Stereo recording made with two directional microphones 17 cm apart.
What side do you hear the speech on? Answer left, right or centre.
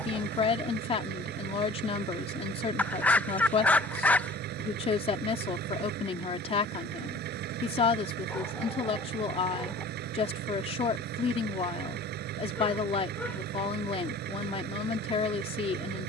left.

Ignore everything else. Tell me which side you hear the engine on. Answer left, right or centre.
right.